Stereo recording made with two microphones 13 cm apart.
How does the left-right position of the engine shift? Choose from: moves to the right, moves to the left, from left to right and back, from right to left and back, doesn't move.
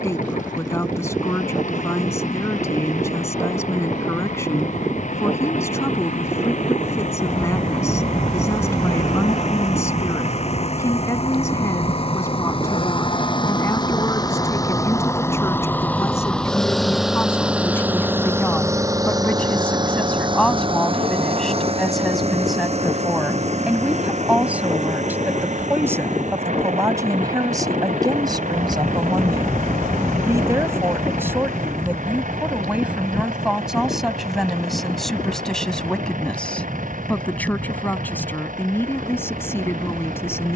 moves to the right.